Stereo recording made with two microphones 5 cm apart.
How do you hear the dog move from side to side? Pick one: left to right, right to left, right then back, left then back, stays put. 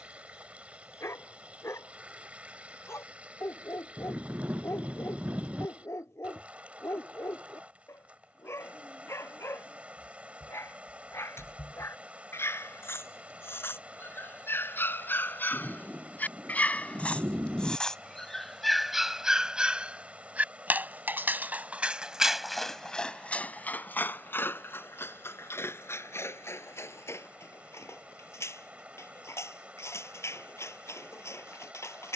right then back.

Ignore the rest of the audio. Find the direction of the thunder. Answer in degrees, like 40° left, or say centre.
40° right.